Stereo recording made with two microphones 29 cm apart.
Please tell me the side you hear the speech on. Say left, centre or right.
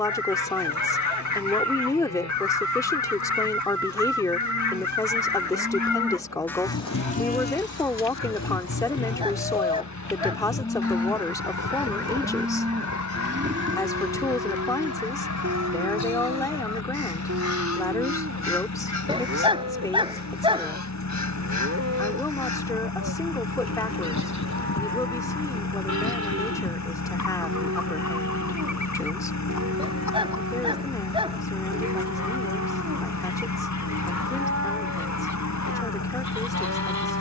centre.